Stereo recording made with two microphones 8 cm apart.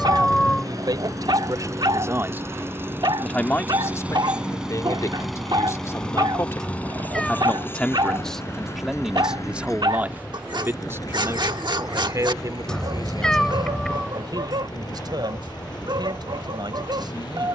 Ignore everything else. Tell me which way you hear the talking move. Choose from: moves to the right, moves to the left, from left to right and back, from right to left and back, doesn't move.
from right to left and back.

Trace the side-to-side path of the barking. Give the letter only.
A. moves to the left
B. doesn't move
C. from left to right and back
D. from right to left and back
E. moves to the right
B.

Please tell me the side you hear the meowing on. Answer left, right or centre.
centre.